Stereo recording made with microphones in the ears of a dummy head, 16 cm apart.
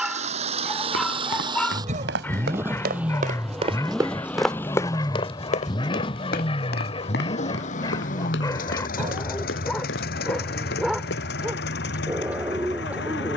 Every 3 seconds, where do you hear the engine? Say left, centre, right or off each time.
right, centre, left, left, left.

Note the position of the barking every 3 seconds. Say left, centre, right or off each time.
centre, left, left, centre, centre.